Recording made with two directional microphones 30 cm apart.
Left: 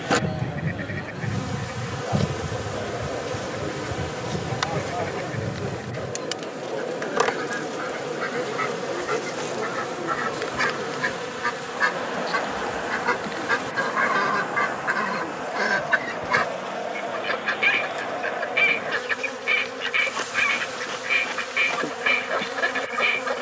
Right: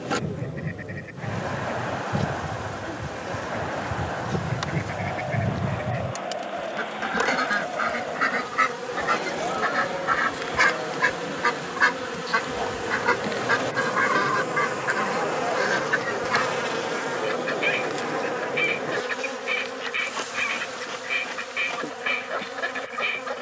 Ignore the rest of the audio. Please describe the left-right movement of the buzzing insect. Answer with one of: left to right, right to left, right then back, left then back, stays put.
right then back.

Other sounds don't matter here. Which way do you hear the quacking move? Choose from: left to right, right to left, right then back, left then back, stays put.
right then back.